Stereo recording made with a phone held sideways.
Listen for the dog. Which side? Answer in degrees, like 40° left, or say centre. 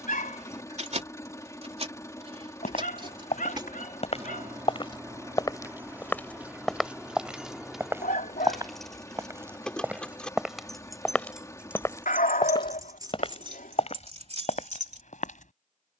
80° left.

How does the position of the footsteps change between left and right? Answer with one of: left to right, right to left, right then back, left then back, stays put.
right then back.